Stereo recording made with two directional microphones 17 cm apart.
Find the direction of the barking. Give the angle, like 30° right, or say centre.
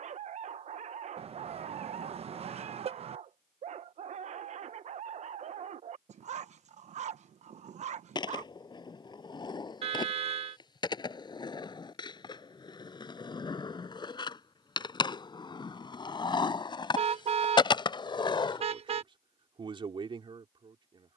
40° right.